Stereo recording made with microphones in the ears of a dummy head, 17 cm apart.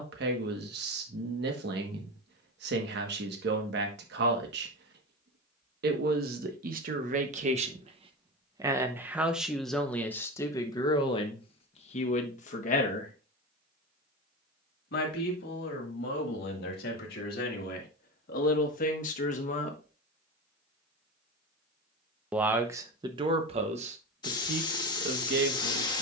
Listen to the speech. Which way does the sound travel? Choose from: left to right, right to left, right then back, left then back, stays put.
left then back.